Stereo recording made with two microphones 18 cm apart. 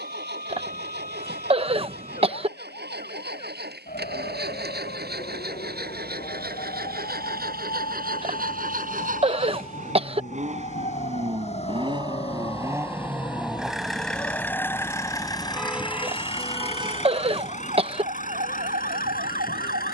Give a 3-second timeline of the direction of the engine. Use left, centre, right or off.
right, right, right, right, centre, left, left.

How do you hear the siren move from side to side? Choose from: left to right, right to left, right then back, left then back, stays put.
left to right.